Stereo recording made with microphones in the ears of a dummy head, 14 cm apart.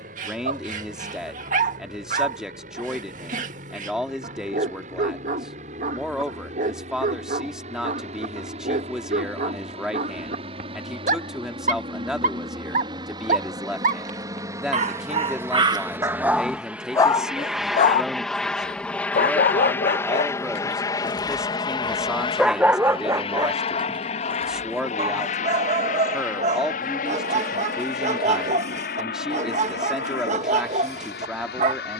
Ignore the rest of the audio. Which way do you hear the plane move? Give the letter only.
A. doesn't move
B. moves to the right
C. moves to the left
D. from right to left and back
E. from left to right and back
C.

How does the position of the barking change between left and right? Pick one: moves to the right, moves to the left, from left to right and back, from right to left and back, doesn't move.
from right to left and back.